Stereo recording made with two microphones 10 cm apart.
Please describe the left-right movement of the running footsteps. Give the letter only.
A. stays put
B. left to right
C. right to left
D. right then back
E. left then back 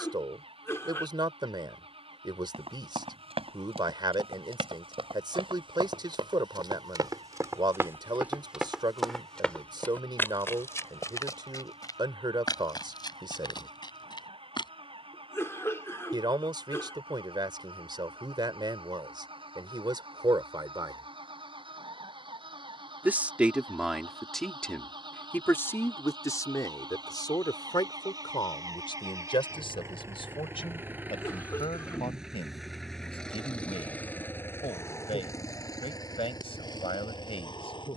C.